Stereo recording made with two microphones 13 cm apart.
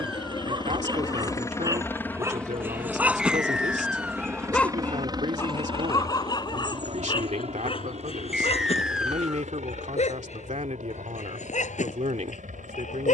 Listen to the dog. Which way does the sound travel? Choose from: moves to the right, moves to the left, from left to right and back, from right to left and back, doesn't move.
moves to the left.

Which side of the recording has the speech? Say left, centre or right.
right.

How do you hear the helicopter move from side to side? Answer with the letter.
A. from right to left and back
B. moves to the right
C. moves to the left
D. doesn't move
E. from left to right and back
B.